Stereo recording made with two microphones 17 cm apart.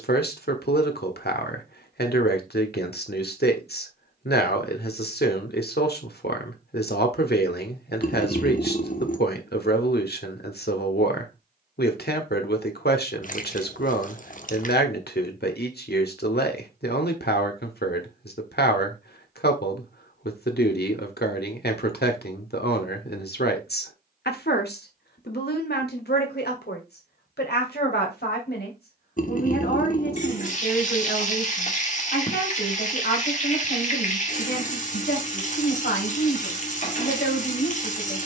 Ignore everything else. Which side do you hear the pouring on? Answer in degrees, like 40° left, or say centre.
50° left.